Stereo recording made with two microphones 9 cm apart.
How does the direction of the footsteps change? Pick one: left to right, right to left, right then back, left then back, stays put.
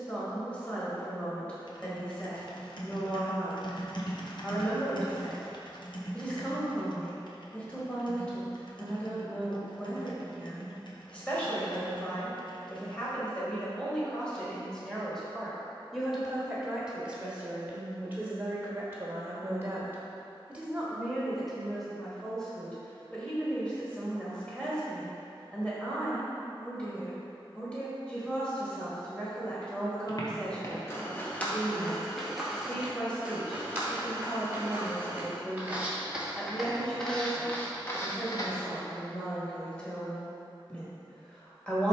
right then back.